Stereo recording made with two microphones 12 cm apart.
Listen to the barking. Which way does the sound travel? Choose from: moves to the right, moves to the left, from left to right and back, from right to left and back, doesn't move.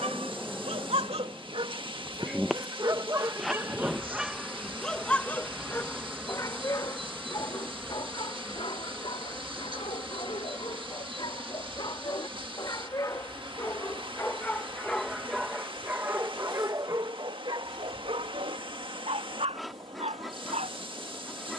from right to left and back.